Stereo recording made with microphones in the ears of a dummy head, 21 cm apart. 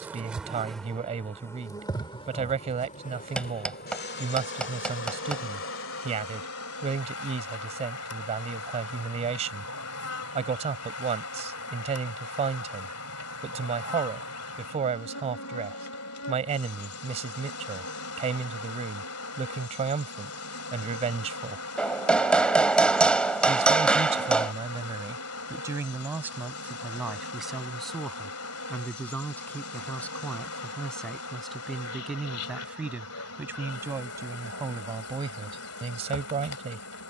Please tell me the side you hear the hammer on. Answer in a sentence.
In this clip you hear the hammer in the centre.